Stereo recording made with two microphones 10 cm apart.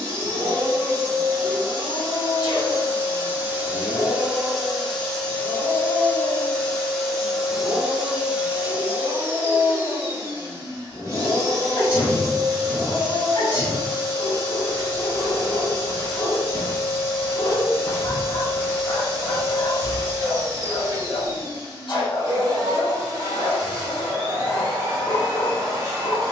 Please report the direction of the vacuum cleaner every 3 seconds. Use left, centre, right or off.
right, centre, centre, right, right, right, right, right, right.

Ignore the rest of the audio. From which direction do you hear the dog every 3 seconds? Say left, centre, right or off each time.
left, centre, right, centre, left, left, left, left, left.